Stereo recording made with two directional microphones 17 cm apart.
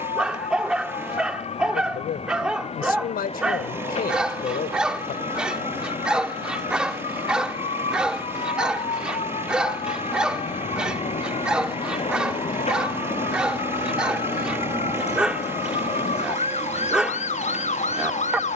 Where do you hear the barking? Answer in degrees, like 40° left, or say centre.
10° right.